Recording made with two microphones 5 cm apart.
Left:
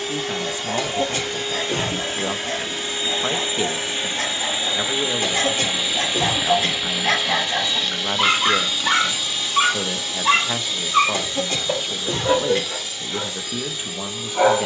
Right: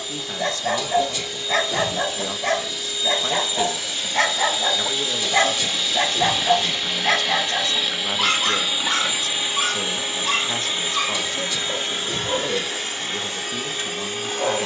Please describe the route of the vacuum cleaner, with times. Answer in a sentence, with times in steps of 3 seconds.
In this clip you hear the vacuum cleaner on the left from 0 s, in the centre from 6 s and on the right from 9 s.